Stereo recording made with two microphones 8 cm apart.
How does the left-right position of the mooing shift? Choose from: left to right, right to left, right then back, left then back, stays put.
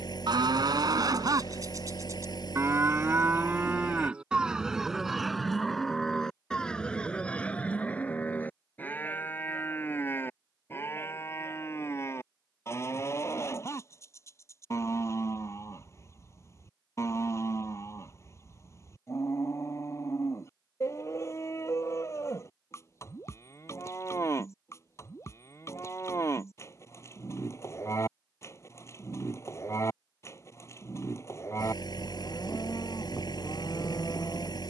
right to left.